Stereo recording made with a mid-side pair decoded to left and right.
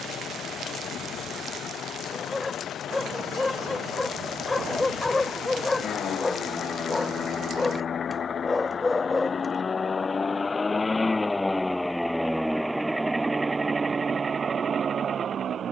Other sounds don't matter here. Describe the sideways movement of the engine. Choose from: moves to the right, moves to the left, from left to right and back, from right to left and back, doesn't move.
moves to the right.